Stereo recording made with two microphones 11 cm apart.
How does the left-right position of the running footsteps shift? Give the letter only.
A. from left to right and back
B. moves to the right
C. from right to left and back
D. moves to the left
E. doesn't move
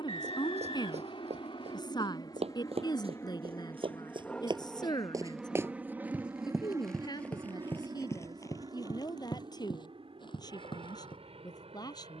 D.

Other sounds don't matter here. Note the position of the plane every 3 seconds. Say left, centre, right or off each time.
left, centre, right, right.